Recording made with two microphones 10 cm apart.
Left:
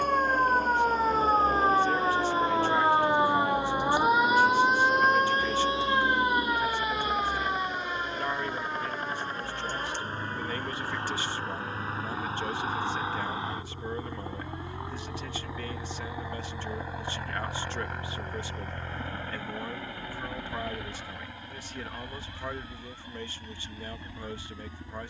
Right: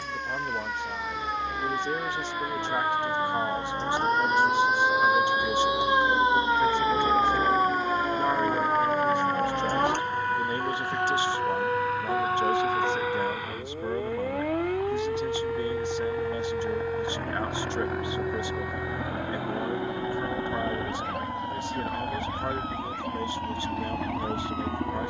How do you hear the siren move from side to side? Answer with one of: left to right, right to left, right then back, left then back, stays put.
left to right.